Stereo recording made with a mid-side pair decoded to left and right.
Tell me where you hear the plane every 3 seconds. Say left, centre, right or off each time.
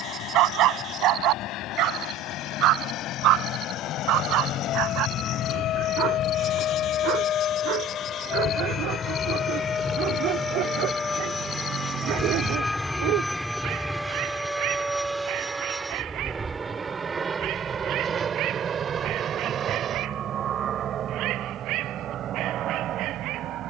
left, left, left, left, centre, right, right, right.